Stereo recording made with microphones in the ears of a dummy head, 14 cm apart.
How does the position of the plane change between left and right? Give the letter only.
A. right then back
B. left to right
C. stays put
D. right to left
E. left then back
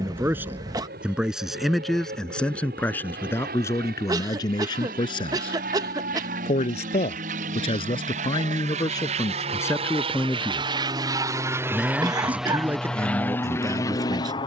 D.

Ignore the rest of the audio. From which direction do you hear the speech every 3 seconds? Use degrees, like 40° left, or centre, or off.
centre, 20° left, 30° left, 10° left, 20° right.